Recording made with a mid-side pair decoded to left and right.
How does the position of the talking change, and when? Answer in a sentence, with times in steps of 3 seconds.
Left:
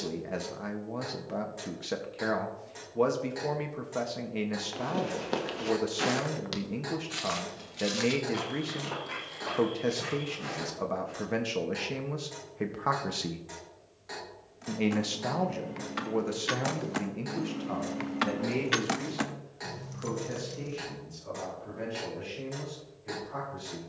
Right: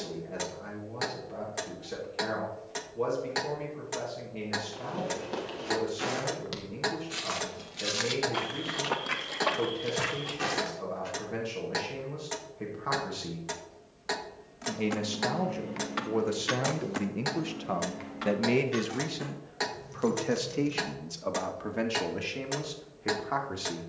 You can hear the talking on the left from 0 s, in the centre from 15 s and on the right from 18 s.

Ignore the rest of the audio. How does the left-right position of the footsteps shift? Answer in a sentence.
You can hear the footsteps go from the left side to the right.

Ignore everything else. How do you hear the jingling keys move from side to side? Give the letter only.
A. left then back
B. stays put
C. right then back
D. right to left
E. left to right
A.